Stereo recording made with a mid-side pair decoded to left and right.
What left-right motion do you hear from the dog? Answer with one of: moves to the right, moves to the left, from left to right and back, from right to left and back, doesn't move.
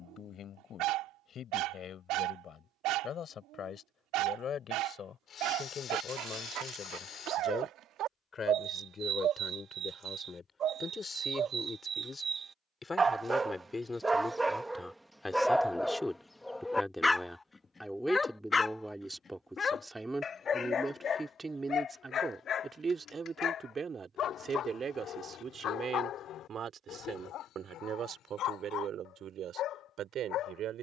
moves to the left.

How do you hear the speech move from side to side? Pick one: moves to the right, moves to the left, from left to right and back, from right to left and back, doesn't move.
moves to the right.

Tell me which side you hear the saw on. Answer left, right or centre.
left.